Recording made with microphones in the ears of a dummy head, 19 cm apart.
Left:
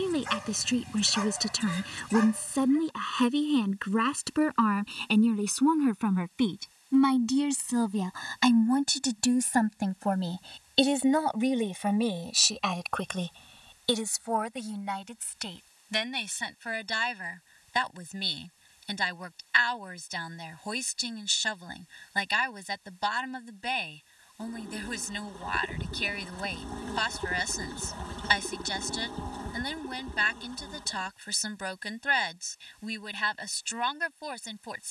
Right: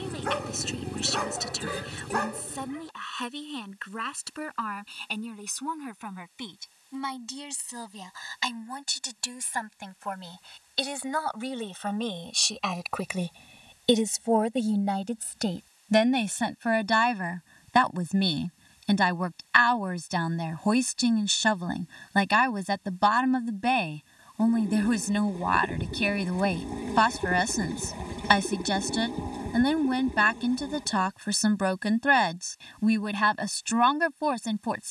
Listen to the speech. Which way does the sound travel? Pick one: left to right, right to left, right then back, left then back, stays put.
left to right.